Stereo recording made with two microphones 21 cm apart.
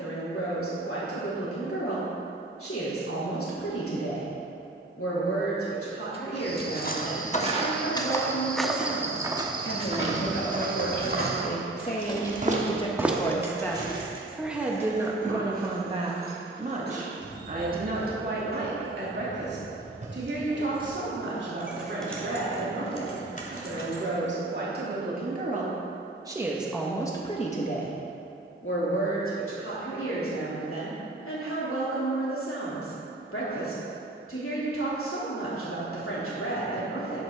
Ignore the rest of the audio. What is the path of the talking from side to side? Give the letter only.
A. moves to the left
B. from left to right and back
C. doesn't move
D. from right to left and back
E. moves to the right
B.